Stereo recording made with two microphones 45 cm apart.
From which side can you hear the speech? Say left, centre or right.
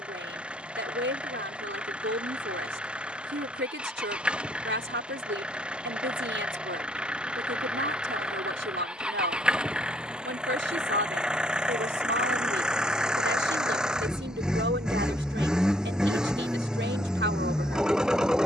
right.